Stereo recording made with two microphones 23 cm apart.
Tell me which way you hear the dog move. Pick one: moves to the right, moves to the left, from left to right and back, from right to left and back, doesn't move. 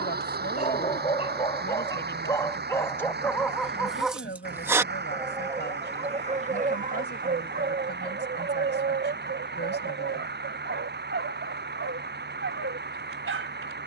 moves to the right.